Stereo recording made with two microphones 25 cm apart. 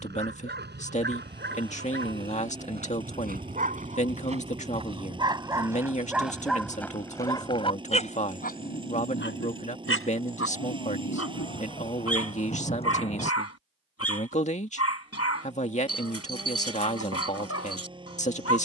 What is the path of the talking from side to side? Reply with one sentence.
You can hear the talking stay put.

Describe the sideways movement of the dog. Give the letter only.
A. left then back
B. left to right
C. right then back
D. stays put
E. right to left
E.